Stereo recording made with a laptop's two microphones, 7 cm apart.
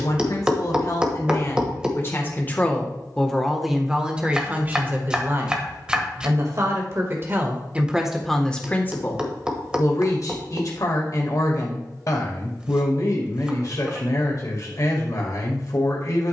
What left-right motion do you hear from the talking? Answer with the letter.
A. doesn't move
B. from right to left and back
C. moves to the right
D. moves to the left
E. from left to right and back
E.